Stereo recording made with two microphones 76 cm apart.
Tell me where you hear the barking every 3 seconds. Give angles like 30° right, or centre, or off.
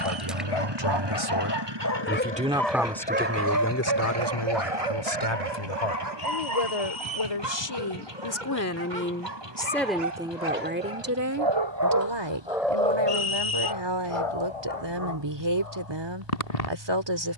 30° left, 40° right, 70° right, 60° right, 20° left, 50° left.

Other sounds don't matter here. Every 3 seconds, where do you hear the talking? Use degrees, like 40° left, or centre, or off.
20° right, 30° left, 30° left, 10° right, 30° right, 30° right.